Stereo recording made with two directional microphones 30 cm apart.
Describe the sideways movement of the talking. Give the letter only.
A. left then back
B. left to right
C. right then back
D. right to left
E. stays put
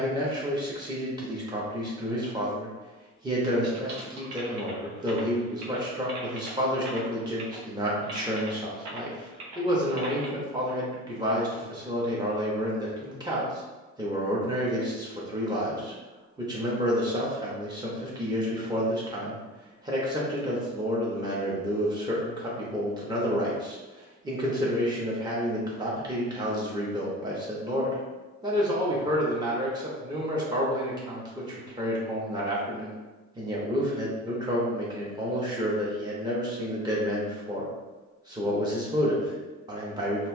E.